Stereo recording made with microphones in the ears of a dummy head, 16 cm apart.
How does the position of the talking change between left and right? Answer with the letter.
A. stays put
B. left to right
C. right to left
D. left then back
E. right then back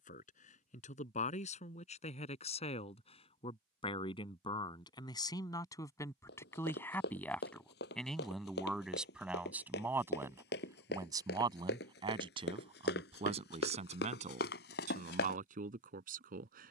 B.